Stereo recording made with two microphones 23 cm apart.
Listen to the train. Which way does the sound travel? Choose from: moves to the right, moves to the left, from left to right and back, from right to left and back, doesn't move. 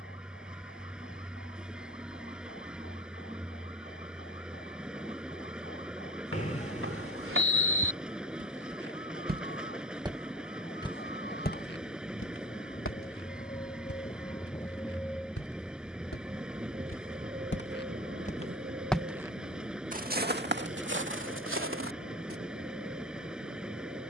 doesn't move.